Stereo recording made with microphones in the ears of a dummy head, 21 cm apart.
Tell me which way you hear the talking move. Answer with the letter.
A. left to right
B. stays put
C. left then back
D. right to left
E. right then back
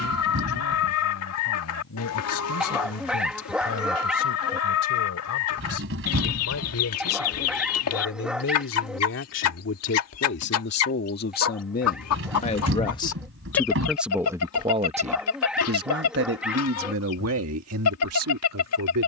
A.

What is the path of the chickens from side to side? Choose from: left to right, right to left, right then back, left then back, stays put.
stays put.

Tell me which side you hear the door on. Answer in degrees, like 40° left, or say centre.
60° right.